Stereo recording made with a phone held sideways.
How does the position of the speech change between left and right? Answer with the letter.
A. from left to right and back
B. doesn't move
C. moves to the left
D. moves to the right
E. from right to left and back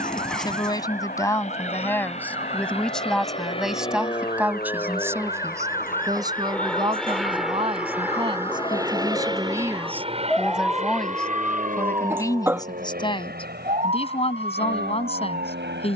A.